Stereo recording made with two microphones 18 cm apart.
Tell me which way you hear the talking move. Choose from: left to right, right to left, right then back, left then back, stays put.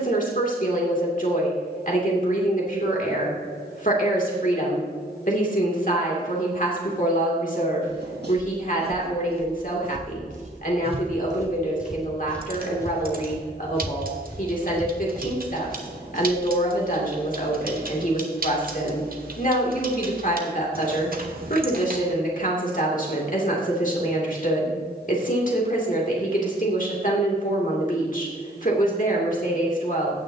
stays put.